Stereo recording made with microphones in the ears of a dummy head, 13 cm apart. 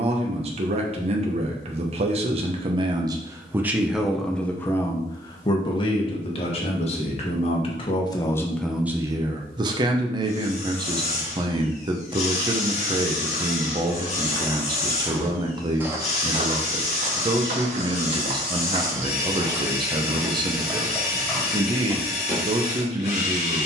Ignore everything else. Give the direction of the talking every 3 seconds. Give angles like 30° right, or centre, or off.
40° right, 10° left, 30° left, 30° right, 30° right, 30° right, 30° right, 30° right.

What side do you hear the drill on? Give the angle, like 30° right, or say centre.
50° left.